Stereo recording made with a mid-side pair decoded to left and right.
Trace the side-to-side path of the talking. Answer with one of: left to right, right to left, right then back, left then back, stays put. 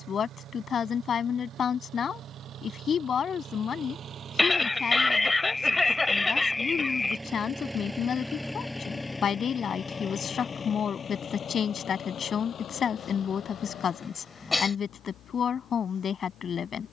stays put.